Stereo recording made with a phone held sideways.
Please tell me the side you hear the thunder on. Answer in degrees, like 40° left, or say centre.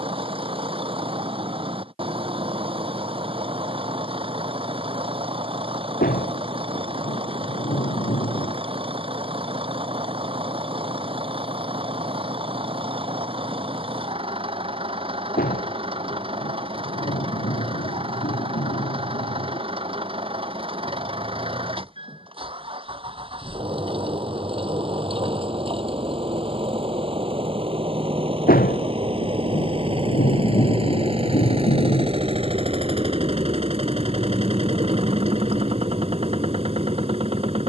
80° left.